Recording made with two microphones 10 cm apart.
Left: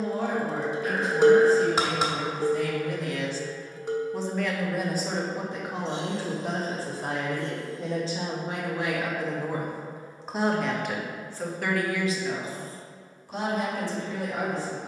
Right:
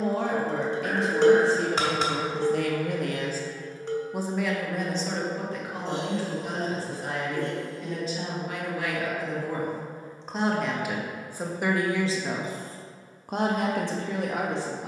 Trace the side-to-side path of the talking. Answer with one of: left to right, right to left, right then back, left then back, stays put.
left then back.